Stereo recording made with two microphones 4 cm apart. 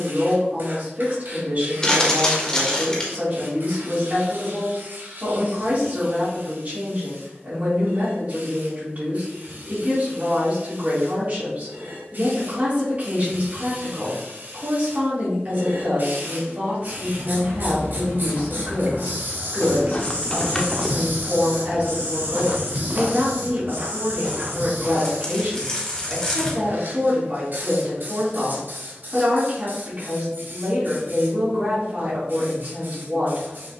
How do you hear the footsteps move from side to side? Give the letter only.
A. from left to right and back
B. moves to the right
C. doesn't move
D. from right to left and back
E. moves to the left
B.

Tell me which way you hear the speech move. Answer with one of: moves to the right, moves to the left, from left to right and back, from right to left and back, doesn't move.
doesn't move.